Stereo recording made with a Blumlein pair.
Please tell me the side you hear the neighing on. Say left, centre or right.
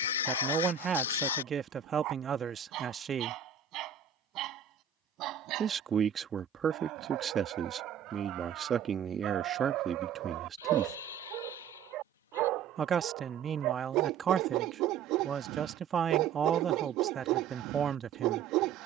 left.